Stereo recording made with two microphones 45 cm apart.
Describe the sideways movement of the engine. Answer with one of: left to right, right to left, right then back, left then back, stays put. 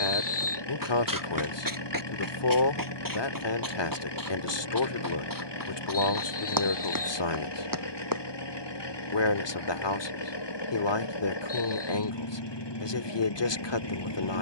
stays put.